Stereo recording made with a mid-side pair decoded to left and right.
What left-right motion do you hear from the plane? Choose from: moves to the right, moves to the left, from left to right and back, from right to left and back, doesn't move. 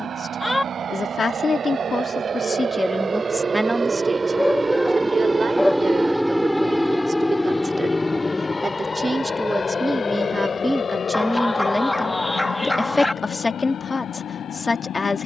moves to the left.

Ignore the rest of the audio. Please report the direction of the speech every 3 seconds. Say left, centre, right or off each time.
left, right, right, centre, left.